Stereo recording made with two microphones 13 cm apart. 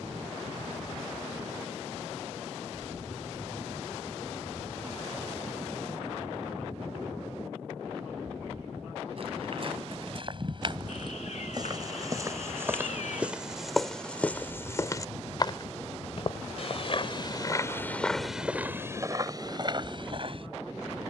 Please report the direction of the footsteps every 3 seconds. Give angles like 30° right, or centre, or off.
off, off, off, 40° right, centre, 40° left, 30° right.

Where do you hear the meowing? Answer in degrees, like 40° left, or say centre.
70° left.